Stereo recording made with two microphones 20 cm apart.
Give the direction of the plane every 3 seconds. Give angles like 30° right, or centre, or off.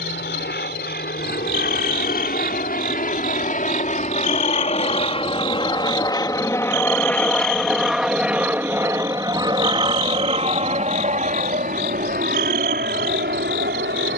50° left, 30° left, centre, 30° right, 50° right.